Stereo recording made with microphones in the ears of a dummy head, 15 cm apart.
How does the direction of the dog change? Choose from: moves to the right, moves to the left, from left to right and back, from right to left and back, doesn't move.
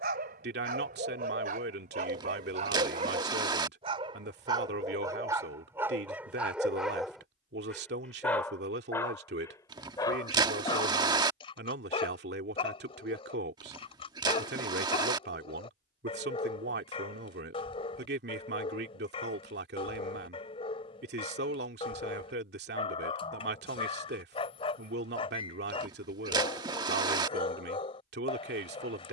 moves to the left.